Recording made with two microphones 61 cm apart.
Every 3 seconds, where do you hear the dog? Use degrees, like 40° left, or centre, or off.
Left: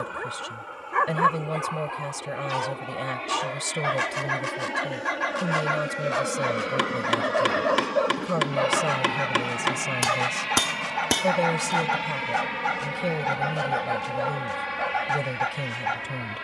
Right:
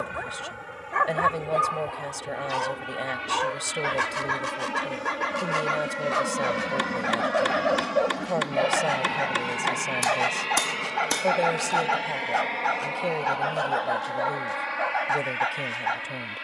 10° right, 10° left, 30° left, 40° left, 50° left, 50° left.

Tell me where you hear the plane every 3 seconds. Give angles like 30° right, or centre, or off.
50° right, 40° right, 20° right, 20° left, 40° left, 60° left.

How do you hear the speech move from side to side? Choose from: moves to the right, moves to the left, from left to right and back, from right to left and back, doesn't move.
doesn't move.